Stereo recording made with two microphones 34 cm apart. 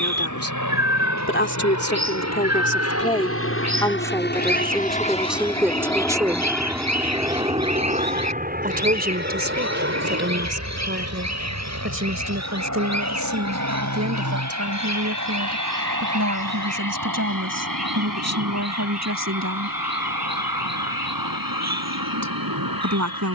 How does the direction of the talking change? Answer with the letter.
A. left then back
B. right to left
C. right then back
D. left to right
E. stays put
D.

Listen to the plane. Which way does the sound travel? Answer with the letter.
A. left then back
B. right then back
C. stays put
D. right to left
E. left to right
E.